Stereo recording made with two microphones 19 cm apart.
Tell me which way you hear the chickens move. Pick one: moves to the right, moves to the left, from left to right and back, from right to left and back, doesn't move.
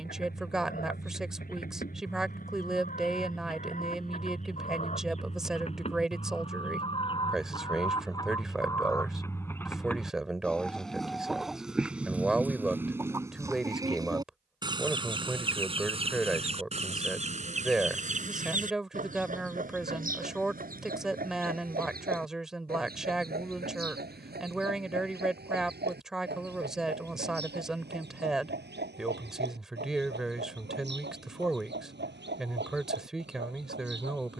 moves to the right.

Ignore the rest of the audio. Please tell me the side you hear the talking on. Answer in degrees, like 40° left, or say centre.
centre.